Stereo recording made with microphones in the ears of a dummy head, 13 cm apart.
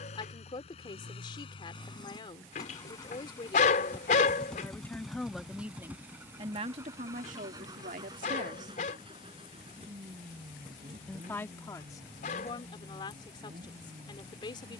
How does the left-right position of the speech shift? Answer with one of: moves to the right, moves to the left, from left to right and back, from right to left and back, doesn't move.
from left to right and back.